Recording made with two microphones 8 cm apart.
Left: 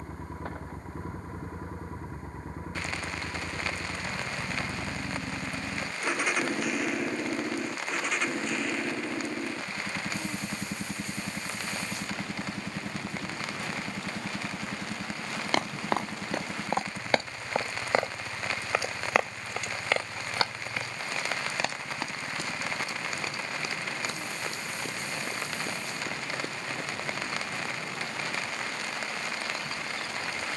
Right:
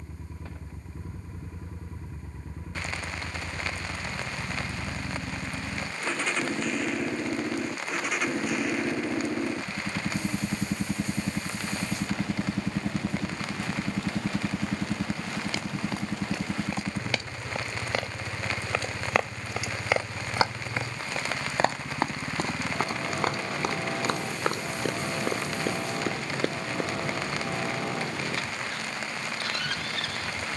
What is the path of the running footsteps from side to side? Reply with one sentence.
In this clip you hear the running footsteps move to the right.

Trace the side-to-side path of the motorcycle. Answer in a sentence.
In this clip you hear the motorcycle move from left to right.